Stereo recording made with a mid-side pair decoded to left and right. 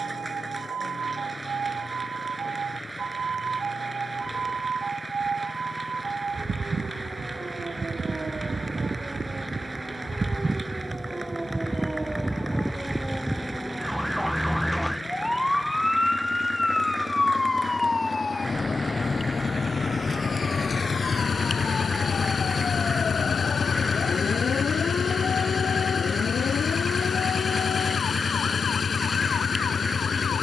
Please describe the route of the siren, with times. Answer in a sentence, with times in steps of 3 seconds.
In this clip you hear the siren on the right from 0 s, in the centre from 12 s and on the left from 18 s.